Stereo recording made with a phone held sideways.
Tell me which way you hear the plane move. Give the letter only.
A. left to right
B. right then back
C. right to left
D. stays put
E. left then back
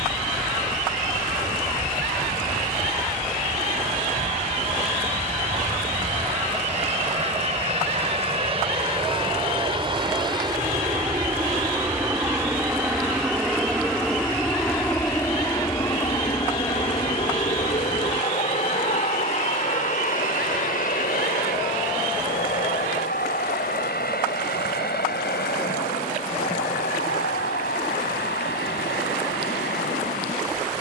C.